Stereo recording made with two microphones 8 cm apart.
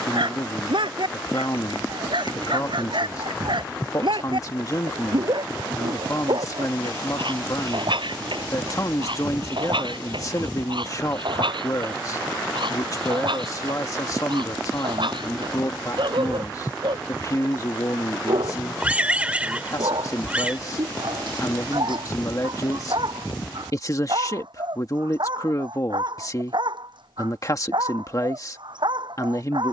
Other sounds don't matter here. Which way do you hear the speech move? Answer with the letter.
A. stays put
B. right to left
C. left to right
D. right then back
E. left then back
A.